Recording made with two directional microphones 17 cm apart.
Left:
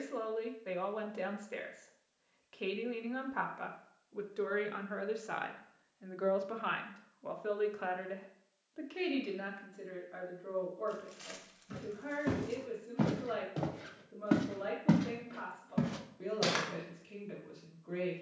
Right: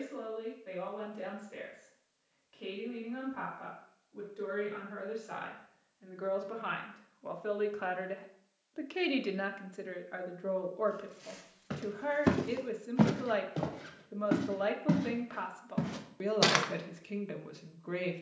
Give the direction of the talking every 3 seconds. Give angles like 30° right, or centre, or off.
50° left, 40° left, centre, 50° right, 50° right, 50° right.